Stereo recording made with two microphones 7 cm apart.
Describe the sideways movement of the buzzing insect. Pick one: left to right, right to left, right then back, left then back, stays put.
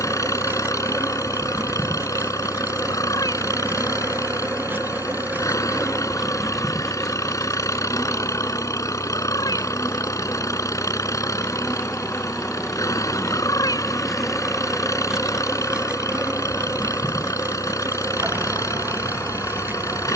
left then back.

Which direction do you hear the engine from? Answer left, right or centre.
left.